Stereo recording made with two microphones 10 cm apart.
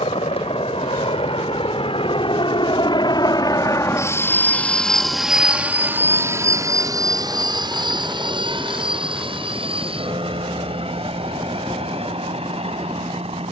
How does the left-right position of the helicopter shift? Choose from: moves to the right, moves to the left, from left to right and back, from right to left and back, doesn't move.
moves to the right.